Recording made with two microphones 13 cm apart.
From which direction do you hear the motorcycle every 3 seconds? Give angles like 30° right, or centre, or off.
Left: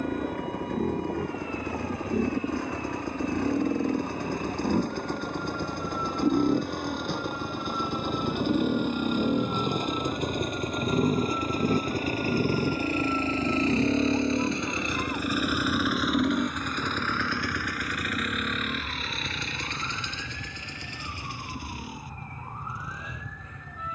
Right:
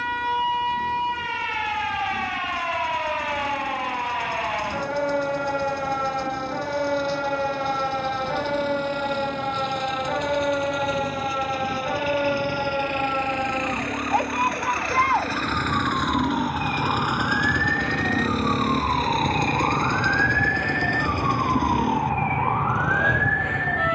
70° left, 60° left, 60° left, 50° left, 30° left, centre, 50° right, 70° right.